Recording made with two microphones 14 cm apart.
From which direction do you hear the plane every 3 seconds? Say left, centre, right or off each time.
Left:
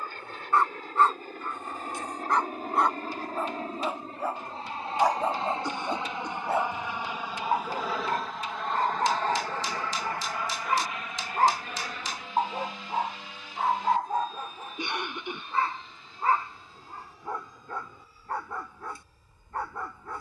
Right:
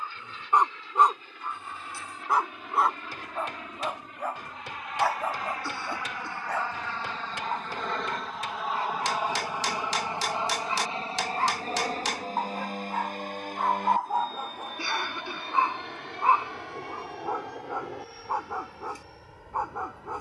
left, left, centre, right, right, right, right.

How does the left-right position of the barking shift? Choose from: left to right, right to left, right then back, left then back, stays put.
left then back.